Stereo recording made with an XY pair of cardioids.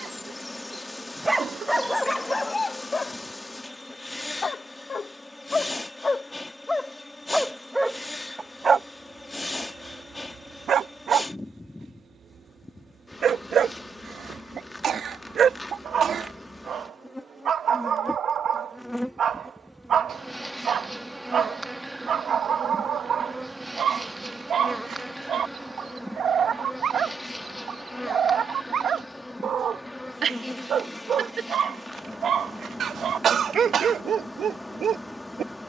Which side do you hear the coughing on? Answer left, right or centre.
right.